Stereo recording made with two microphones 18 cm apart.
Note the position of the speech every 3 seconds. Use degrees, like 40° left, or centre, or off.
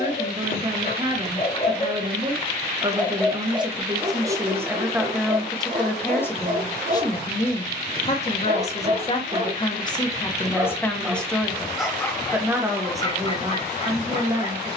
30° right, 10° right, 30° left, 10° left, 20° right.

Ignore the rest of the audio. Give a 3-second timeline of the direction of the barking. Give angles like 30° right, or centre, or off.
40° left, 30° right, 50° right, 10° right, 30° left.